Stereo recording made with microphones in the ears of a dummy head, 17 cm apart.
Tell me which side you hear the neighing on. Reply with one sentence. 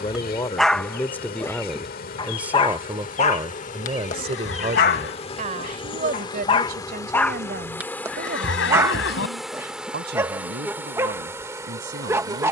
You can hear the neighing on the left.